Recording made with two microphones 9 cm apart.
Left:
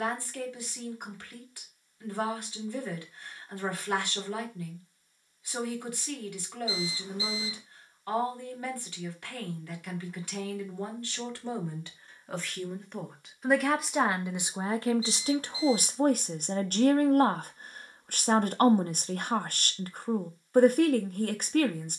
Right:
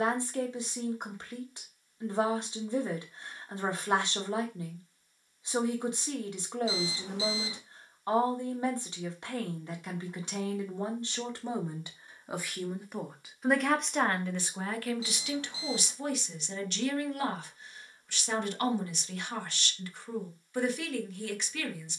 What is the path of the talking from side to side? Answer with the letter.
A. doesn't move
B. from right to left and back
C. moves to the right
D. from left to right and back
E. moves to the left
E.